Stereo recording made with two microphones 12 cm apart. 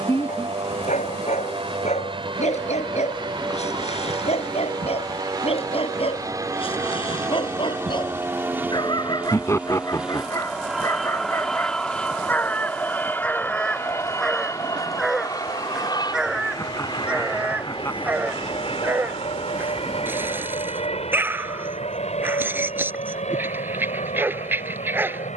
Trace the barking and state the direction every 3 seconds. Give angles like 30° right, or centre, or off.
70° left, 60° left, 40° left, 30° left, 10° left, 10° right, 20° right, 20° right, 20° right.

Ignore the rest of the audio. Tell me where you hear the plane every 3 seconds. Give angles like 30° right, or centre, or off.
50° right, 40° right, 20° right, centre, 20° left, 30° left, 50° left, 60° left, 60° left.